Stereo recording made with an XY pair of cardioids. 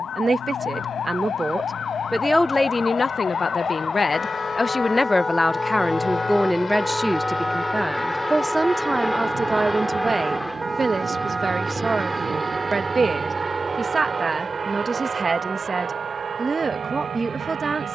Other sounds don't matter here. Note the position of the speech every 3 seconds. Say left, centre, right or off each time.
centre, left, centre, right, right, right.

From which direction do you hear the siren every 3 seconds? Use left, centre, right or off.
left, left, centre, right, right, right.